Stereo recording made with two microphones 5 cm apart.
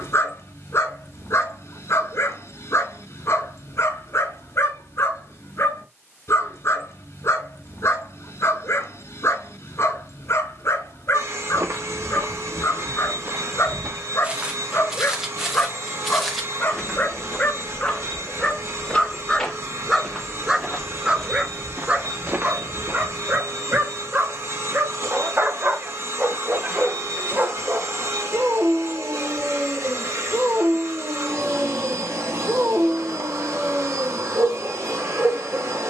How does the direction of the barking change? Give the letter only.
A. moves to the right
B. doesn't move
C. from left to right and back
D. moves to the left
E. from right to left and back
A.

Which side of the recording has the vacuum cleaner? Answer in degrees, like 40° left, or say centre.
70° right.